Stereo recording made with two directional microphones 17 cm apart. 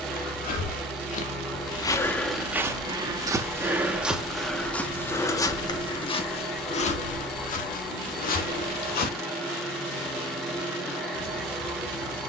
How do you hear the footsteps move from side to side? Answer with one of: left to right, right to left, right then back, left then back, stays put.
right then back.